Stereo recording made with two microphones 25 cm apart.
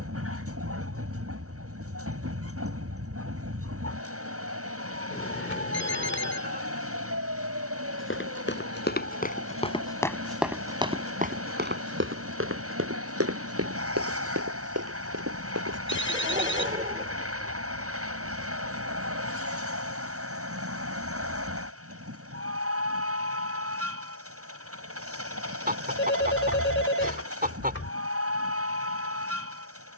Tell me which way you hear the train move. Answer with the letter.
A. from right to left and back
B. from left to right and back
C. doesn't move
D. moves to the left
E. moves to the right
C.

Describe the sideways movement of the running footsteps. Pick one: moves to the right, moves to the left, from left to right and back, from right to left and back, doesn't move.
moves to the right.